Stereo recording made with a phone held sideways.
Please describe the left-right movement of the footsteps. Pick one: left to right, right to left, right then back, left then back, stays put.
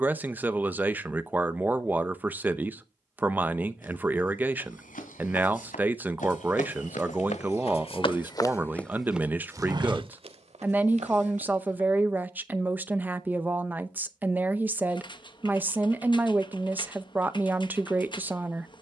left to right.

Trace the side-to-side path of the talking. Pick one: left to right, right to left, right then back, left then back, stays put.
stays put.